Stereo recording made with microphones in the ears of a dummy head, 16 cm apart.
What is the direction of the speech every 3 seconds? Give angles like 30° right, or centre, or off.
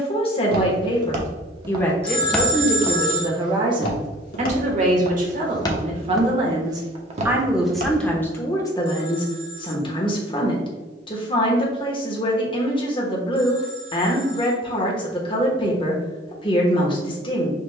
20° left, 30° right, centre, 30° left, 30° left, 30° left.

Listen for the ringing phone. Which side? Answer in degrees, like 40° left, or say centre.
30° left.